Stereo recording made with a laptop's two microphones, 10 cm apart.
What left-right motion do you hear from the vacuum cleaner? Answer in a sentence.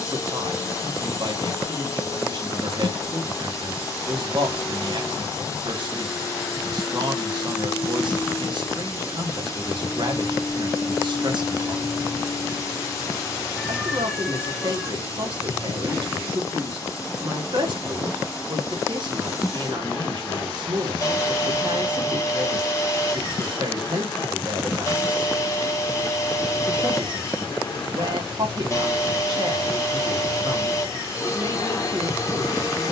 You can hear the vacuum cleaner stay put.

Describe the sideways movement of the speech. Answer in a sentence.
You can hear the speech stay in one place.